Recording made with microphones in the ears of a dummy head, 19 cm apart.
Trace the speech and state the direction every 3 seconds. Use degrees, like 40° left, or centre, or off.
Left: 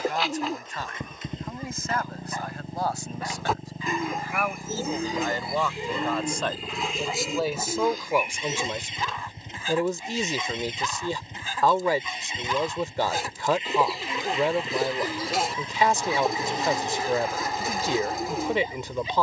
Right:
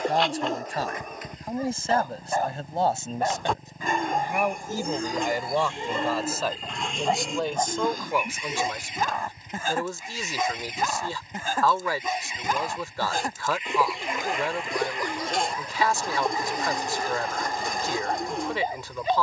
30° right, 20° right, 10° left, 20° left, 20° left, 20° left, 20° left.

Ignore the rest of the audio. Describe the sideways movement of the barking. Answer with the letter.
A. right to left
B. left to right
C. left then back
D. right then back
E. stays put
E.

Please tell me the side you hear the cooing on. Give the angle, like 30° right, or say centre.
centre.